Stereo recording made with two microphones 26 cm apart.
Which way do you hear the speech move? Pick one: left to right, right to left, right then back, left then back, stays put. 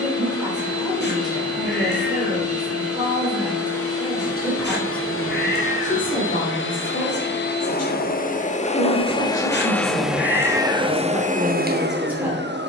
left then back.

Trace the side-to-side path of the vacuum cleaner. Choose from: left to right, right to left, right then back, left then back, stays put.
left to right.